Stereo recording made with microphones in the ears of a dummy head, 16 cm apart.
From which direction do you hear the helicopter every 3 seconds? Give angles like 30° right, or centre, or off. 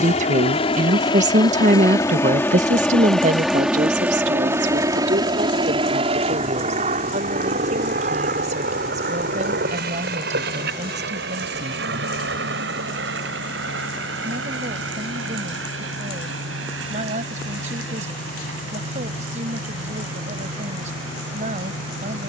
20° left, 10° right, 40° right, 50° right, 60° right, 70° right, 70° right, 70° right.